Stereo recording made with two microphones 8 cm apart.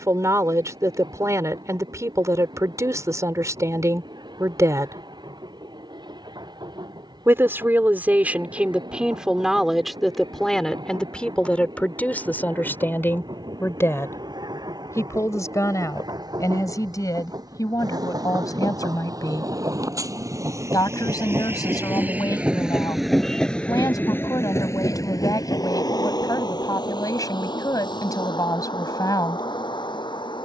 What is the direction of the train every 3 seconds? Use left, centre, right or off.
right, right, right, right, right, right, right, centre, left, left.